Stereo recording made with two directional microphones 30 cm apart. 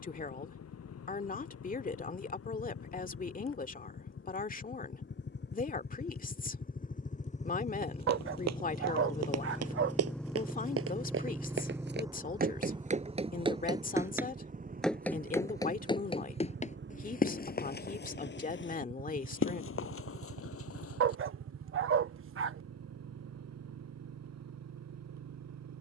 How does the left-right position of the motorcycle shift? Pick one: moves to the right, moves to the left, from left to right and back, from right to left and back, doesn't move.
moves to the right.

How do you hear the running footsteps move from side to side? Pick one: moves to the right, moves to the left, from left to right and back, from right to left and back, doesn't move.
moves to the left.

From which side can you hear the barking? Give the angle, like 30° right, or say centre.
40° right.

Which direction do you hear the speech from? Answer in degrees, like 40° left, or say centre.
30° left.